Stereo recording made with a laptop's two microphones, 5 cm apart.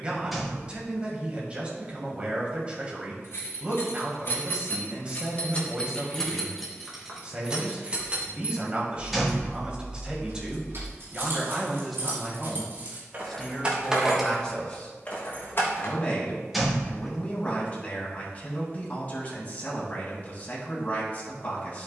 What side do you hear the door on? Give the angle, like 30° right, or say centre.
centre.